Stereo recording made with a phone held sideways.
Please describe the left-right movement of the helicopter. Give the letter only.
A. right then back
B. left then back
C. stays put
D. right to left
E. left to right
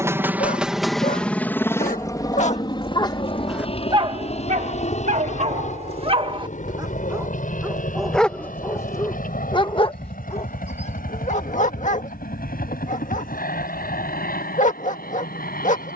D.